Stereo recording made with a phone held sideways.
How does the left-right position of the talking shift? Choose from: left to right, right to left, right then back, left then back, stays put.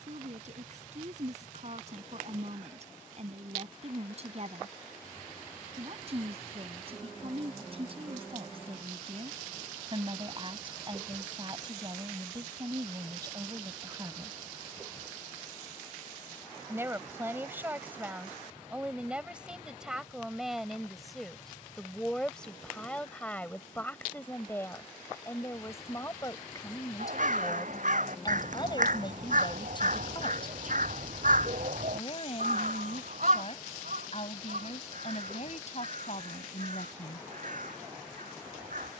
right to left.